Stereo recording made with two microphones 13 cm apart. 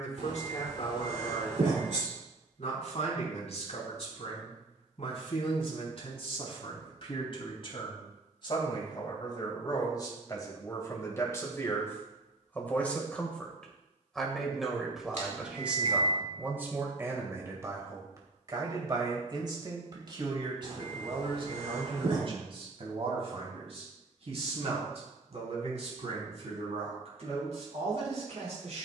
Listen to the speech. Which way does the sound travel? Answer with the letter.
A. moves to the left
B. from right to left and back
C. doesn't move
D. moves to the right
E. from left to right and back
D.